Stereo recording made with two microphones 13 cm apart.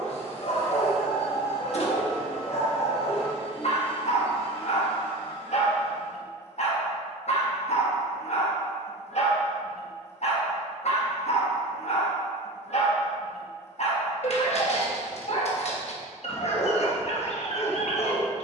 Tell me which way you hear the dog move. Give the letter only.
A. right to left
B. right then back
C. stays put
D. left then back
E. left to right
C.